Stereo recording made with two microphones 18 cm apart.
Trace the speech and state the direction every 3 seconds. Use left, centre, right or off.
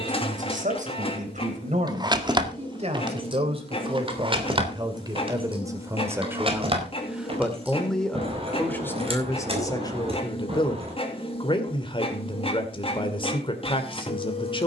right, right, centre, left, left.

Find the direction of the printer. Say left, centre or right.
left.